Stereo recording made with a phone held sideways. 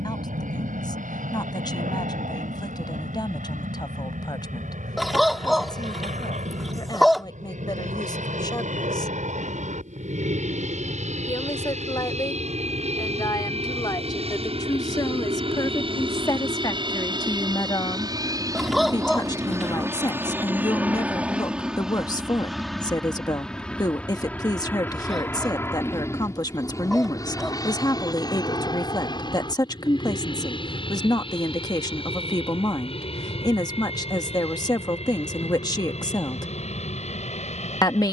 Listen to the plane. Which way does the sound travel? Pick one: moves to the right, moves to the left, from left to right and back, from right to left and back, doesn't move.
moves to the left.